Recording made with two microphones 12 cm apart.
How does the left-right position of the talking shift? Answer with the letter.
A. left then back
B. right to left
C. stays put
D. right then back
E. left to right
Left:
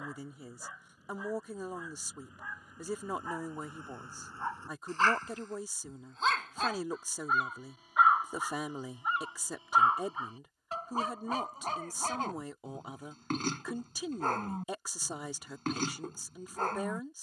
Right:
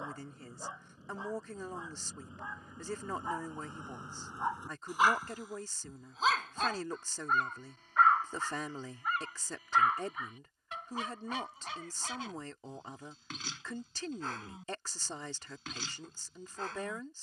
C.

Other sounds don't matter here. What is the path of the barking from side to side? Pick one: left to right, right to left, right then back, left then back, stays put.
right to left.